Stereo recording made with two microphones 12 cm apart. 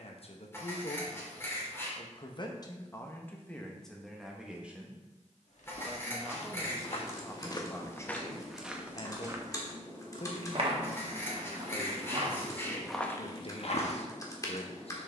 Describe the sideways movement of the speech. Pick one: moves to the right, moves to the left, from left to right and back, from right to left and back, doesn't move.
from left to right and back.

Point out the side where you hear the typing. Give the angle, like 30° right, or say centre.
30° left.